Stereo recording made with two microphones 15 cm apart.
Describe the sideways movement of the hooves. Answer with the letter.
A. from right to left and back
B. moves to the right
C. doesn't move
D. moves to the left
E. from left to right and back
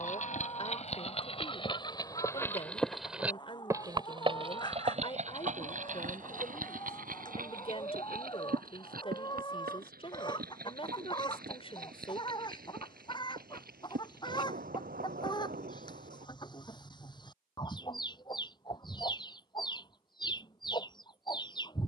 B.